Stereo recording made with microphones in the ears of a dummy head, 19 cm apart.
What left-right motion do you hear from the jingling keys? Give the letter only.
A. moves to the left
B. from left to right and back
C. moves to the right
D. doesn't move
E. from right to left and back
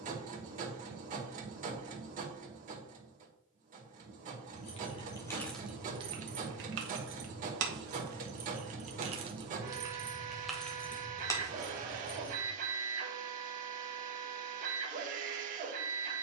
B.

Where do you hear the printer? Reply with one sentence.
You can hear the printer on the right.